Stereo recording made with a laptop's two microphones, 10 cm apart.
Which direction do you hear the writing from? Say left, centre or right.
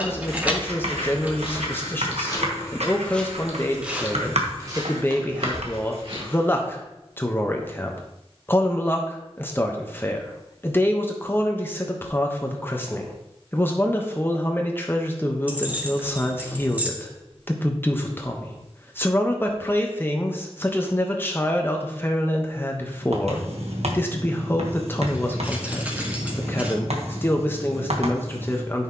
right.